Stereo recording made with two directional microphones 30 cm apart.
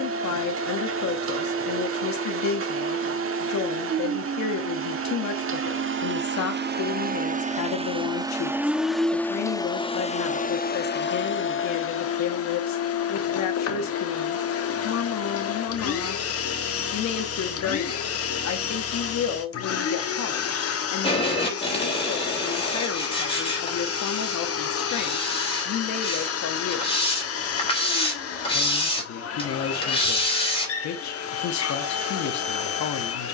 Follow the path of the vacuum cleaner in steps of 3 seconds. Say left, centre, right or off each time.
right, right, right, left, left, left, left, left, left, left, left.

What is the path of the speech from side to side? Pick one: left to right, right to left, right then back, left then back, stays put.
stays put.